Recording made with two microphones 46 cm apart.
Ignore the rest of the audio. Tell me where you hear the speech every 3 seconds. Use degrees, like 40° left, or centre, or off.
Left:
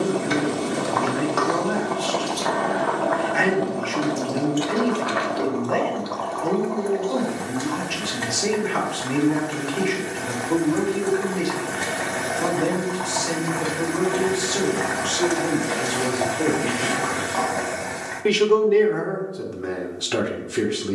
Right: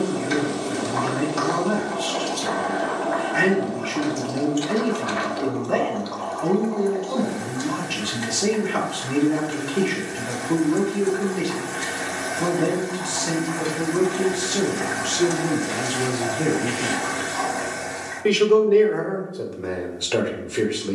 50° right, 50° right, 50° right, 50° right, 50° right, 30° right, 30° left.